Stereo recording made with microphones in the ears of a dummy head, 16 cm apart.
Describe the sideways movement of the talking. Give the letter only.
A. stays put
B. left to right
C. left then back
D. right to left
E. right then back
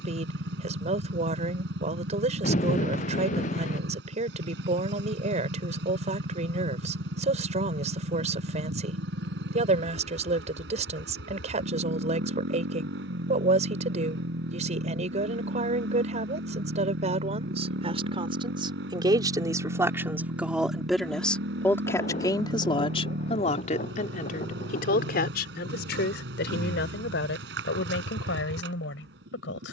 D.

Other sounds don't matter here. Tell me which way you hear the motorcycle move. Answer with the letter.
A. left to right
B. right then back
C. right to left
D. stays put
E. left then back
D.